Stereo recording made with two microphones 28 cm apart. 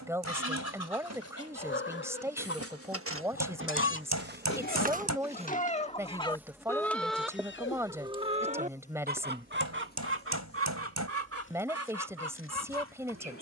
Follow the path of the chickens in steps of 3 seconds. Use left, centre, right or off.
left, left, centre, right, right.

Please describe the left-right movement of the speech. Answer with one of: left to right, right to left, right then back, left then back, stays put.
stays put.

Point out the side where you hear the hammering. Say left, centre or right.
right.